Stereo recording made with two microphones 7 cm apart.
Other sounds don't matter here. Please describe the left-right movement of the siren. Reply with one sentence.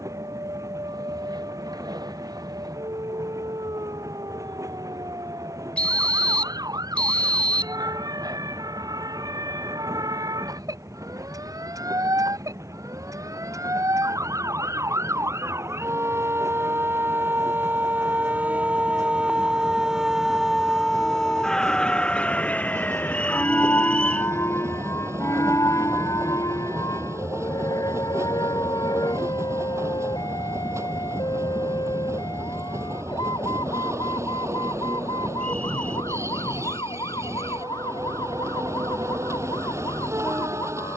You can hear the siren move to the left.